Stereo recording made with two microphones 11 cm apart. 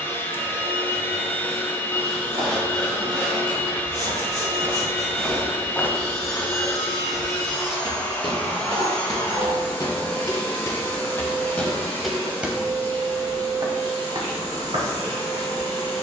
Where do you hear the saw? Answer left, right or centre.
centre.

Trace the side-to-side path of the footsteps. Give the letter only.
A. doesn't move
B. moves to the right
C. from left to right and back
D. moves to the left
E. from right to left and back
E.